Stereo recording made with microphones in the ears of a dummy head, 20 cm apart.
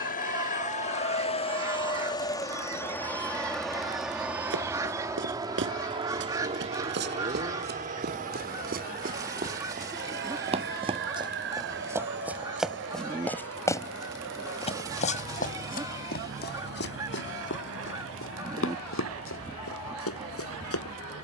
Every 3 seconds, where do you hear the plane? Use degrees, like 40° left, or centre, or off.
30° left, 10° right, 30° right, 50° right, 50° right, 60° right, 60° right.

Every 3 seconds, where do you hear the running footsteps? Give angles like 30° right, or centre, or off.
off, 60° right, 50° right, 30° right, 10° left, 50° left, 70° left.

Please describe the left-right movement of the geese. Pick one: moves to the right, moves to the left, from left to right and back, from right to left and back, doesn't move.
doesn't move.